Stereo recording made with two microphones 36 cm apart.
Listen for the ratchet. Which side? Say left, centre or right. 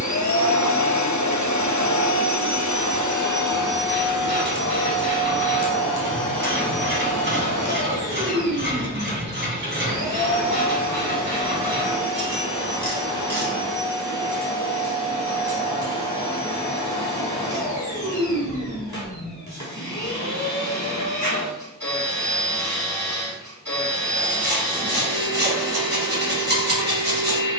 right.